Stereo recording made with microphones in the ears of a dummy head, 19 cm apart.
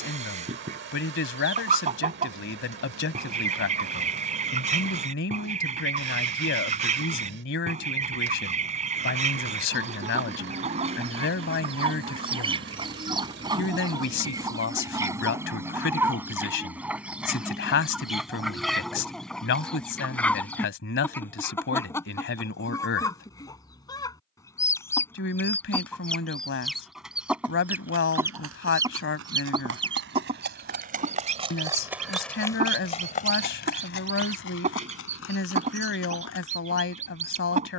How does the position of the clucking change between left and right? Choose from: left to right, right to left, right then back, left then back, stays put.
left then back.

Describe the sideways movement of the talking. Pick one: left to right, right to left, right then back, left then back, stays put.
stays put.